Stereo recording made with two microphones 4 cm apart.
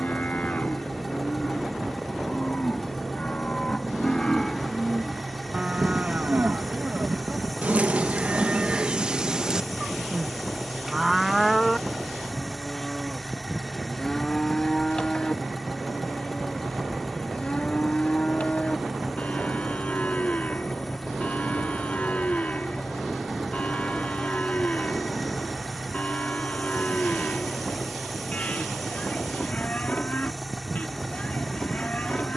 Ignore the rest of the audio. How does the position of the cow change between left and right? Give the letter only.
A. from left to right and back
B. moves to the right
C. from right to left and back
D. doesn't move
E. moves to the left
A.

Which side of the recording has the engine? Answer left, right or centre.
centre.